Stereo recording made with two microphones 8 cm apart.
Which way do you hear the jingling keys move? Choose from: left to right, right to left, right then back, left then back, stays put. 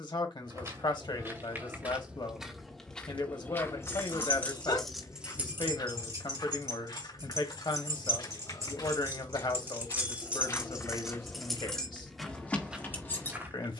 right then back.